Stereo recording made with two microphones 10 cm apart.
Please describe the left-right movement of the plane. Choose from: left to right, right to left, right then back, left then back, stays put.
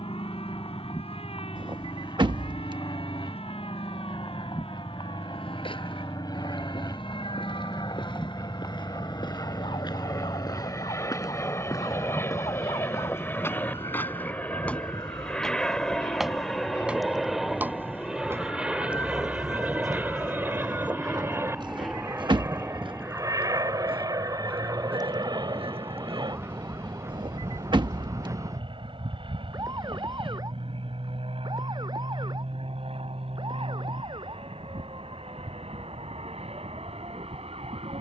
left to right.